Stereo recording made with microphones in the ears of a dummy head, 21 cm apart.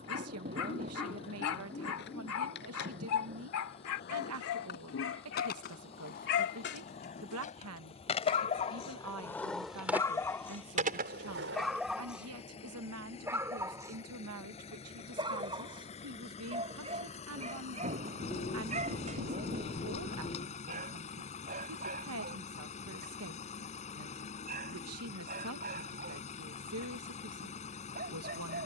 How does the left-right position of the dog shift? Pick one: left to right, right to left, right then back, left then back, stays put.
left to right.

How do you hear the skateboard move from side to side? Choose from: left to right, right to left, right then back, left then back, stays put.
left to right.